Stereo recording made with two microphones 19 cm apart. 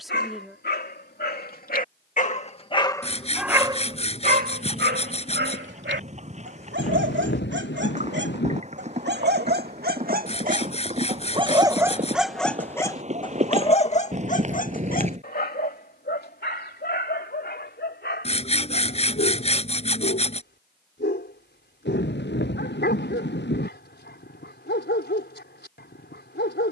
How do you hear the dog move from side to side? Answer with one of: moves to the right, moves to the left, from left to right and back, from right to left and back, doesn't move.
from left to right and back.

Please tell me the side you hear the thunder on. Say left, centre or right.
left.